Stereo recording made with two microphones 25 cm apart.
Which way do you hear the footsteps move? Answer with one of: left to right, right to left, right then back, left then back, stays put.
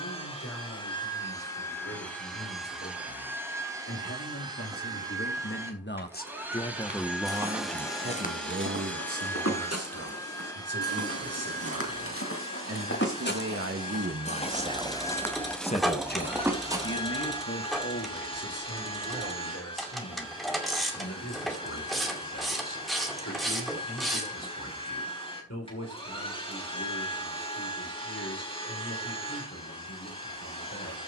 left then back.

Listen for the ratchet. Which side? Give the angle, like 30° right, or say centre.
centre.